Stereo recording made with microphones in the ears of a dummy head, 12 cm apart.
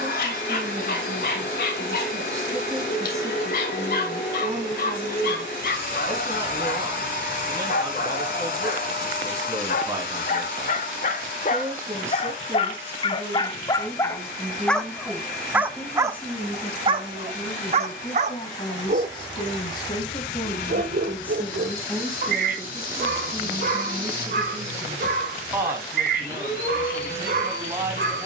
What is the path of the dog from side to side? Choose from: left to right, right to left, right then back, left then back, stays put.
left to right.